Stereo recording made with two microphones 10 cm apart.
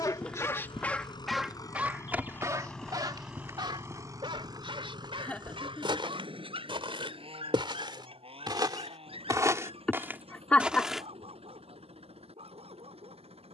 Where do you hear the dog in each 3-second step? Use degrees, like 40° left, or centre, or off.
centre, 60° right, 70° right, 70° right, 80° right.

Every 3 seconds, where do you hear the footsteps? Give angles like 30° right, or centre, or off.
10° right, 40° right, 50° right, 20° right, off.